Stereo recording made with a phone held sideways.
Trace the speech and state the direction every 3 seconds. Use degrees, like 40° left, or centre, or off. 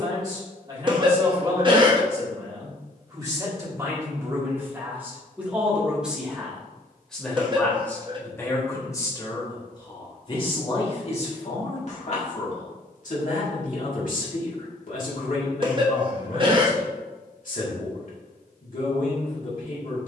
30° right, 20° right, 10° left, 40° left, 60° left, 60° left, 60° left.